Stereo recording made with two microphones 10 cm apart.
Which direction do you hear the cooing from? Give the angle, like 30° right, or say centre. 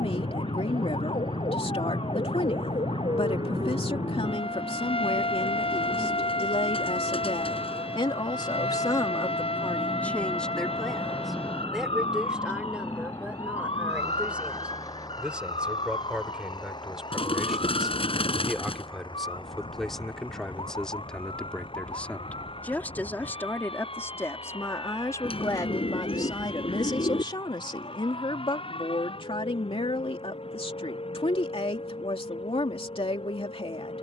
70° left.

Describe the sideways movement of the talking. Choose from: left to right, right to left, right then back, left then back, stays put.
right then back.